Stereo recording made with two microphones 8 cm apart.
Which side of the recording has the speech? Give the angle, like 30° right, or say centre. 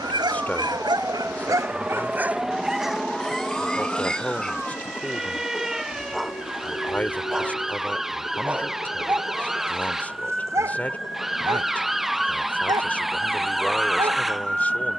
20° left.